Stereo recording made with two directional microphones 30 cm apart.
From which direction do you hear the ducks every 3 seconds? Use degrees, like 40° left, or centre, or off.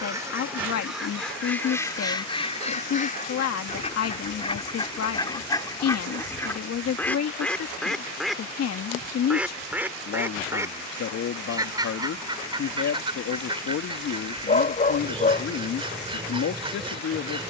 10° left, 20° left, 10° left, 10° right, 20° right, 20° right.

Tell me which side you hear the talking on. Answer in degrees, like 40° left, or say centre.
60° left.